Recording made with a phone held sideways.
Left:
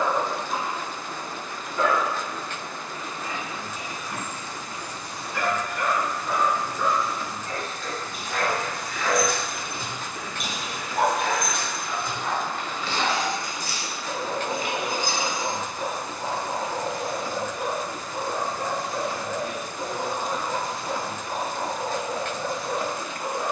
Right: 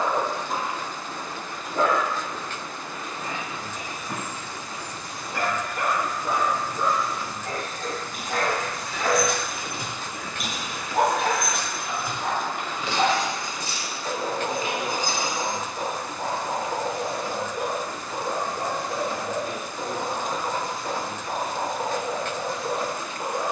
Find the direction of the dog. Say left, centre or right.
right.